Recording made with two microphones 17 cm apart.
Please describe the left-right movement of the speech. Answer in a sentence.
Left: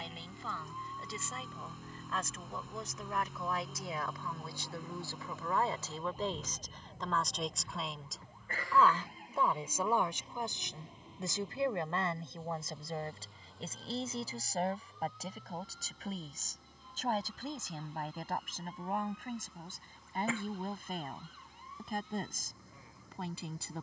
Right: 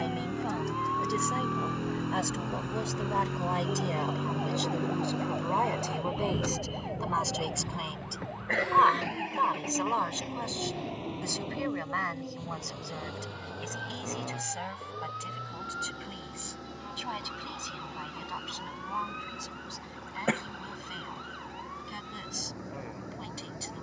You can hear the speech move to the left.